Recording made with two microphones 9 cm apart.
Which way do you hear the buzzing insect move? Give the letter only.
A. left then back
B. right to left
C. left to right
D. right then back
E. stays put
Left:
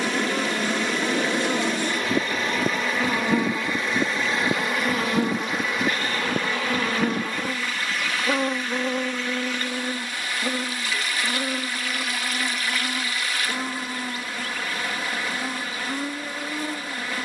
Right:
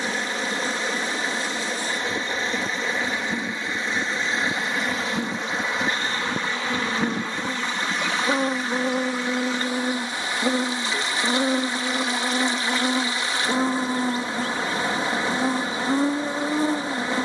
C.